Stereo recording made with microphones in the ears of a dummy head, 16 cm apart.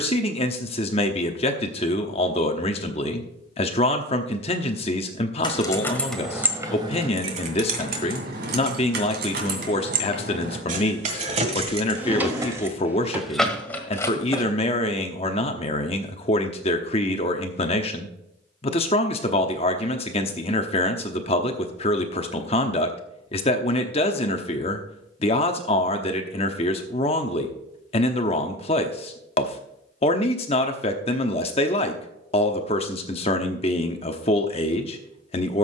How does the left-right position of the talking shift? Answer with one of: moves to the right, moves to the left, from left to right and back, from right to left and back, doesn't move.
doesn't move.